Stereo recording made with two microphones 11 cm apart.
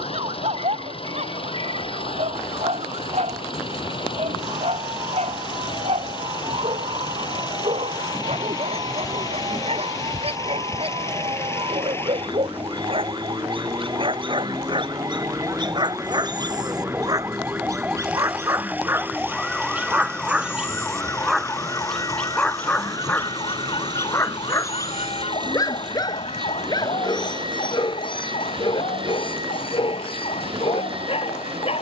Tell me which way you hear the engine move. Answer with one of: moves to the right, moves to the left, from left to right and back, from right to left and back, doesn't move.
moves to the right.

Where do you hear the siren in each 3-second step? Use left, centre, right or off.
right, right, right, right, right, right, centre, left, left, left, left.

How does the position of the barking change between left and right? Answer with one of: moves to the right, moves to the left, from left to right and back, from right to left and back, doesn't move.
moves to the left.